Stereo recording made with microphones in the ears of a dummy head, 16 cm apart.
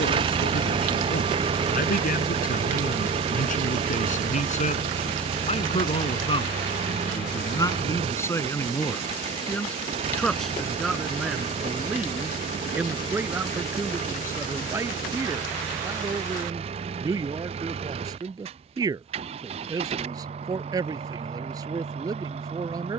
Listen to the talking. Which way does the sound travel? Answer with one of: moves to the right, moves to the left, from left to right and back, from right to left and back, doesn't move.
moves to the right.